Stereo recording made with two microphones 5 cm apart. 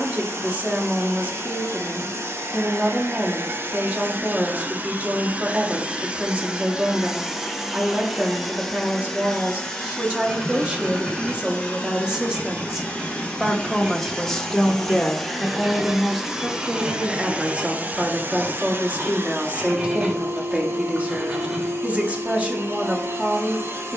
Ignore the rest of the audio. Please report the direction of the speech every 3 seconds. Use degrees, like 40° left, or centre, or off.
30° right, 30° right, 30° right, 20° right, centre, 10° right, 30° right, 30° right.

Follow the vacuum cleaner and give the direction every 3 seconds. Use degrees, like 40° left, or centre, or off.
70° right, 40° right, 10° right, 20° left, 20° left, 10° right, 60° right, 70° right.